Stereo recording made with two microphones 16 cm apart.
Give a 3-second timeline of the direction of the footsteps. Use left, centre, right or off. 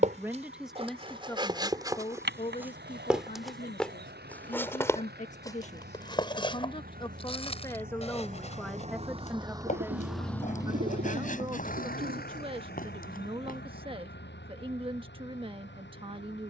right, centre, left, left, left, off.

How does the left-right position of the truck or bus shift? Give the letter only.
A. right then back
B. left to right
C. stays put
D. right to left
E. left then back
D.